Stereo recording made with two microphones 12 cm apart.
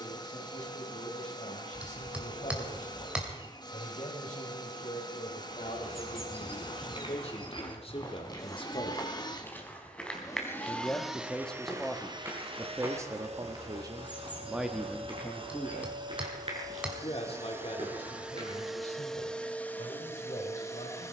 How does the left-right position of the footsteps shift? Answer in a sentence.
You can hear the footsteps travel towards the right.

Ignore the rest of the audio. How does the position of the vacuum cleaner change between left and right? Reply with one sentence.
You can hear the vacuum cleaner move from left to right and back again.